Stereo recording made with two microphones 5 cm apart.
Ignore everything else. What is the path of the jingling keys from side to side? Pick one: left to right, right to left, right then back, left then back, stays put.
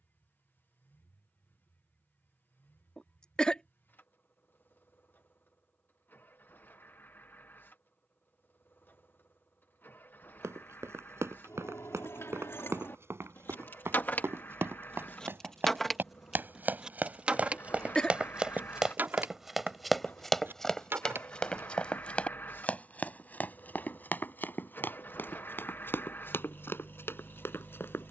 left to right.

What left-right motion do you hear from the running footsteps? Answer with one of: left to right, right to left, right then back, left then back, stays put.
right to left.